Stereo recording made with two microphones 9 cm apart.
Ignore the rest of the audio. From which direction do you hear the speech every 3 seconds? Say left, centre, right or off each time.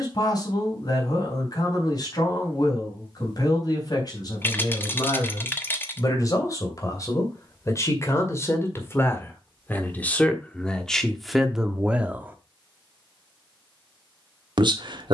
left, left, left, centre, right.